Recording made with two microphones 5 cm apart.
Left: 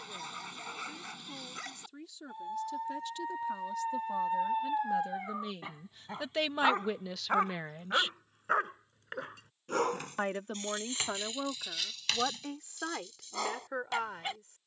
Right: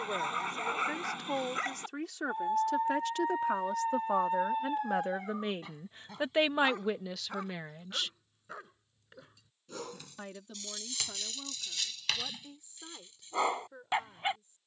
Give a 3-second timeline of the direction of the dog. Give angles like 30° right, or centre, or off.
30° right, centre, 50° left, 30° left, 20° right.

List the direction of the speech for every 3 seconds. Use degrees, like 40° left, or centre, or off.
70° right, 60° right, centre, 60° left, 70° left.